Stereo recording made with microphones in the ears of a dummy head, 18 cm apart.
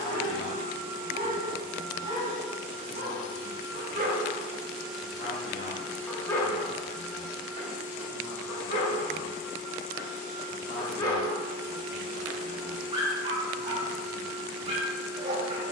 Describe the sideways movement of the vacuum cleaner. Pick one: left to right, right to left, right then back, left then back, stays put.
left then back.